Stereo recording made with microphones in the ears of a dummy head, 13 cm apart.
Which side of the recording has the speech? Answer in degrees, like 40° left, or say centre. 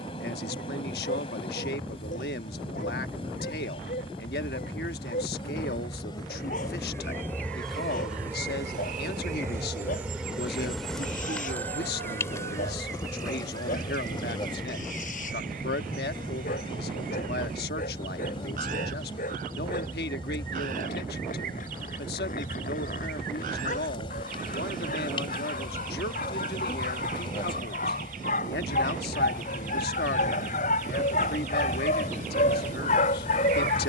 80° left.